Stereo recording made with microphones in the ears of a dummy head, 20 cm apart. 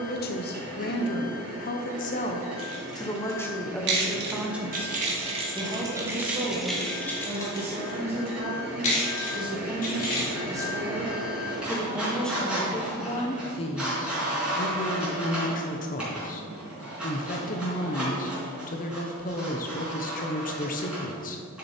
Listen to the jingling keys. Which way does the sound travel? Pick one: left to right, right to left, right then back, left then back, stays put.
right to left.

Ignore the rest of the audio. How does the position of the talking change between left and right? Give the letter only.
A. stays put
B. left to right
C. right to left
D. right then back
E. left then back
D.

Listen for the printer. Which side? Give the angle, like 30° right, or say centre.
centre.